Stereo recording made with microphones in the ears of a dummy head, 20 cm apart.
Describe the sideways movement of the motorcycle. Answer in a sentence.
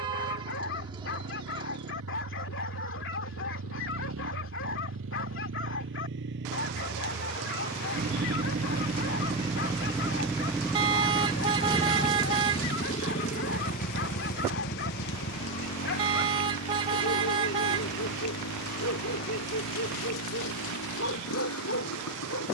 In this clip you hear the motorcycle travel towards the left.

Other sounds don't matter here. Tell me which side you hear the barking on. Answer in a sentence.
In this clip you hear the barking on the left.